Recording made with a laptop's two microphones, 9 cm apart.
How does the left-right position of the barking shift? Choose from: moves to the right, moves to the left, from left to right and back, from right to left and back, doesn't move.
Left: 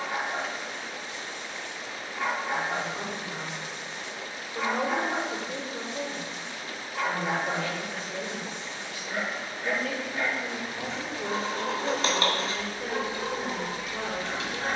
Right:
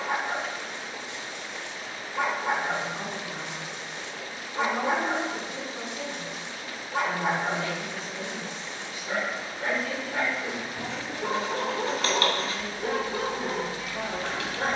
doesn't move.